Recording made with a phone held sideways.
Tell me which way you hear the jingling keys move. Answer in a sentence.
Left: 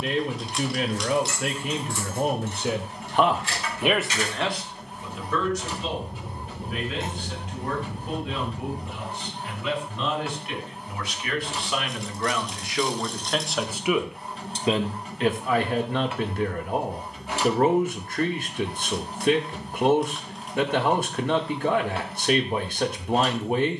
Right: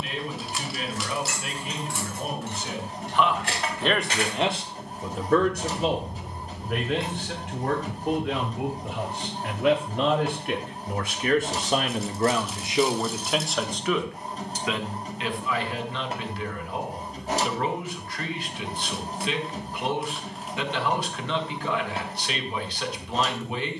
In this clip you hear the jingling keys move to the left.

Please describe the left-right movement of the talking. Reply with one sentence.
In this clip you hear the talking go right and come back.